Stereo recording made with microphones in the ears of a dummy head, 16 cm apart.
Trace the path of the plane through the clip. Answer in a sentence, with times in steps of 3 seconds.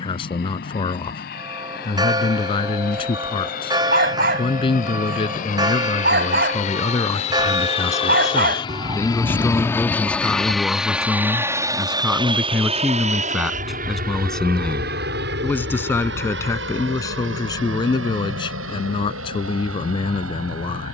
You can hear the plane on the left from 0 s, in the centre from 9 s and on the right from 12 s.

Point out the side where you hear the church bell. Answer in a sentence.
You can hear the church bell on the right.